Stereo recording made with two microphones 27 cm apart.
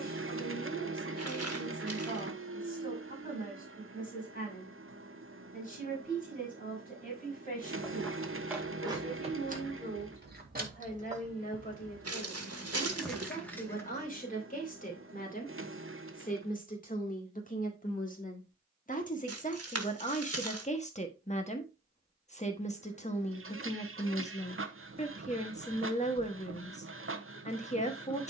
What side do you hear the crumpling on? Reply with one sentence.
In this clip you hear the crumpling on the right.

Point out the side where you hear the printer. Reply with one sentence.
In this clip you hear the printer on the right.